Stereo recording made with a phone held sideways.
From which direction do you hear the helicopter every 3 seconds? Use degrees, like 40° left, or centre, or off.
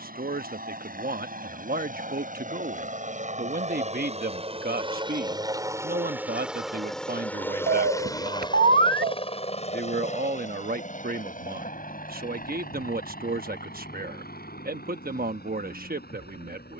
60° right, 40° right, 10° left, 40° left, 60° left, 60° left.